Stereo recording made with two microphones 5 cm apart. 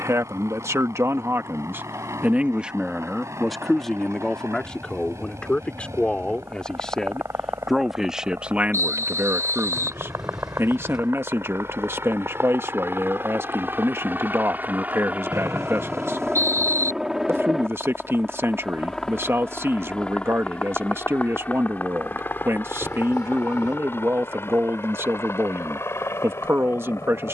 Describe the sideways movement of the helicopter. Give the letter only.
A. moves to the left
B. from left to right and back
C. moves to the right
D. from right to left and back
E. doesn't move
A.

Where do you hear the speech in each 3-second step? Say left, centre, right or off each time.
right, centre, centre, right, right, right, right, right, right.